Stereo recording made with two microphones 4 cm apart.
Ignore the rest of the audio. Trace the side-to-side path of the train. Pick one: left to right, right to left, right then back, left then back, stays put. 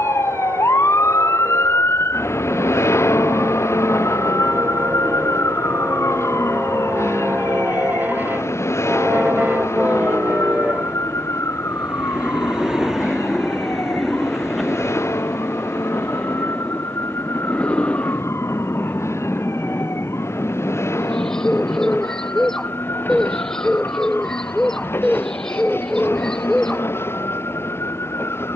right to left.